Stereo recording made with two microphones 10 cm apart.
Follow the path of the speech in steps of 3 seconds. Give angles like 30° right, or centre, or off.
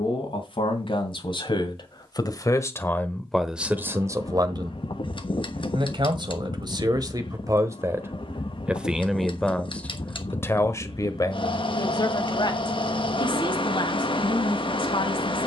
50° left, 30° right, 30° right, 20° left, 60° left.